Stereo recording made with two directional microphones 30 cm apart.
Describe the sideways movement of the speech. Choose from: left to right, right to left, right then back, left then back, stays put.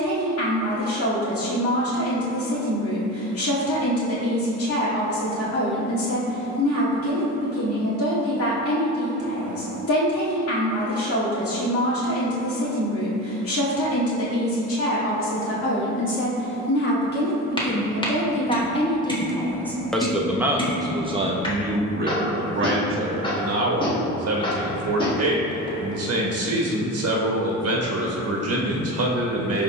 left to right.